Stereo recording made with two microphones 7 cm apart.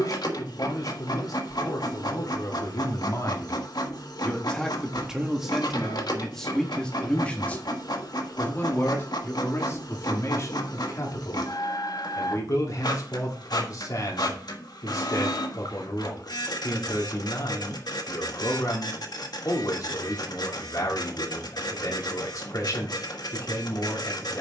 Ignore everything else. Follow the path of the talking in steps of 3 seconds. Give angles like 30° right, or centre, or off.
60° left, 10° left, 20° left, 40° left, 50° left, 50° left, 50° left, 50° left.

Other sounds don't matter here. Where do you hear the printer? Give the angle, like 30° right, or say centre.
60° left.